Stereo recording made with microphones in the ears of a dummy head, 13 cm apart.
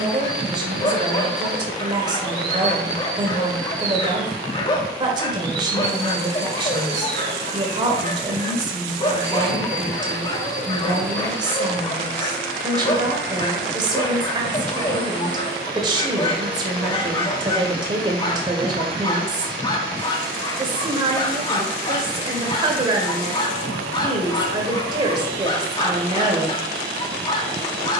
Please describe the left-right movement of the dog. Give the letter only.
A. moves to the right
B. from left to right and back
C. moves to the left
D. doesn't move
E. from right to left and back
D.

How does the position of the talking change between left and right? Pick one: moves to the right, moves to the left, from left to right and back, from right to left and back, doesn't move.
doesn't move.